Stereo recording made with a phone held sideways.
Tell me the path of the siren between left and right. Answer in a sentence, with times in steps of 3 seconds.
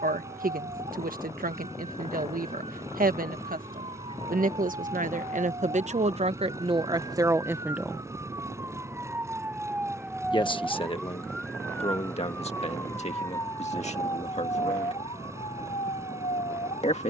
You can hear the siren on the right from 0 s, in the centre from 9 s and on the left from 12 s.